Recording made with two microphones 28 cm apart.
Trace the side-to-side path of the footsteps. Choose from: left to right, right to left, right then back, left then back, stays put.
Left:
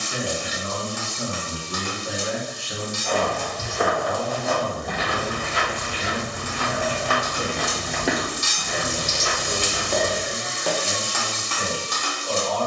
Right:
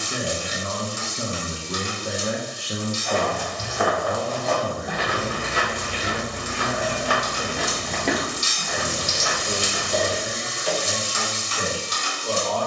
right then back.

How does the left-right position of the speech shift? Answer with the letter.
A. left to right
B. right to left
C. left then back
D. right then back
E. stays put
C.